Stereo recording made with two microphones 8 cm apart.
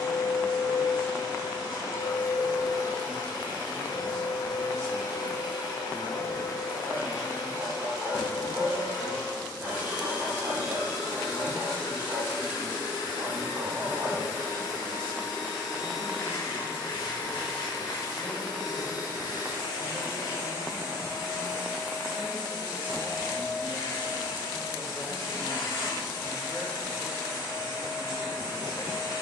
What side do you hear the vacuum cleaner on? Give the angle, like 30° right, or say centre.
70° left.